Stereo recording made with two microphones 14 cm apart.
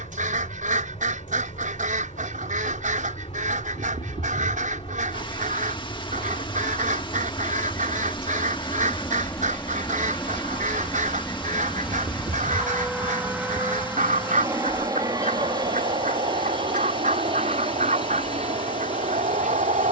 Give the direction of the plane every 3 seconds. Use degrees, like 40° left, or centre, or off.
50° left, 40° left, 30° left, 10° left, 10° right, 30° right, 50° right.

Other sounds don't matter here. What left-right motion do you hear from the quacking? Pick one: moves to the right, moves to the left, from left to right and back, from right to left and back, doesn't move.
doesn't move.